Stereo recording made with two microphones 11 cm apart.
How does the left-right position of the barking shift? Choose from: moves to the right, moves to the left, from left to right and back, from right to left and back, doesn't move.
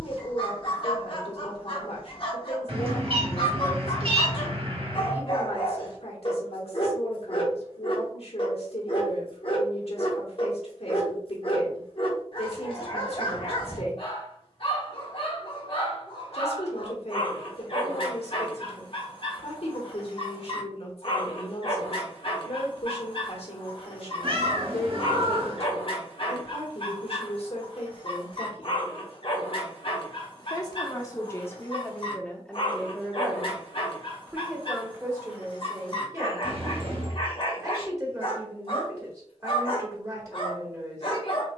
doesn't move.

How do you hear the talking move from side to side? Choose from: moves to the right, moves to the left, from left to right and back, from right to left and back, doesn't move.
moves to the right.